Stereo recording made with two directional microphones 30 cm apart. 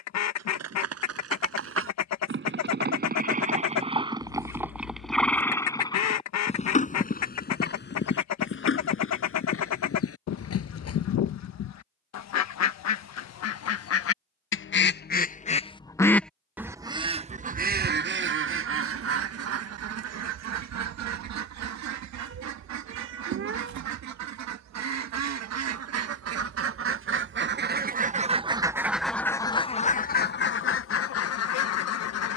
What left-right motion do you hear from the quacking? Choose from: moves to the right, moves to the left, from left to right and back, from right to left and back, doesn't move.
from left to right and back.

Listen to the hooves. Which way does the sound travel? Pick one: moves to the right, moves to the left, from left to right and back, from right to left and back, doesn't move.
moves to the left.